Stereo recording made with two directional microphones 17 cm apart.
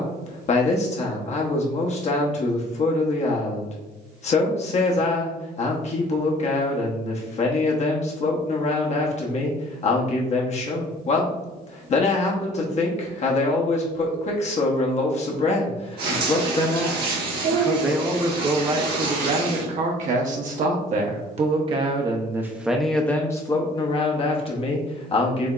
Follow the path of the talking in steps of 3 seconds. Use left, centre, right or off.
left, left, left, left, left, left, right, centre, left.